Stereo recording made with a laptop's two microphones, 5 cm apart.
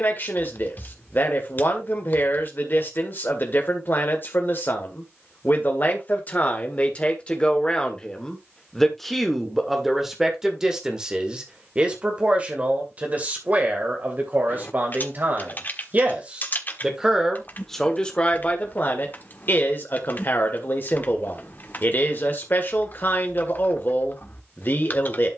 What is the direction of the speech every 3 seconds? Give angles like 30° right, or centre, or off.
40° left, 40° left, 20° left, 10° right, 30° right, 20° right, 40° left, 40° left, 40° left.